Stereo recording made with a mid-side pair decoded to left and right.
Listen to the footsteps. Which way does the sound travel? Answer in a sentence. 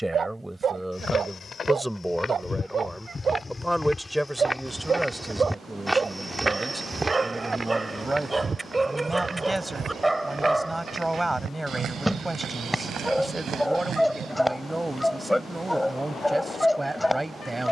You can hear the footsteps go from the left side to the right.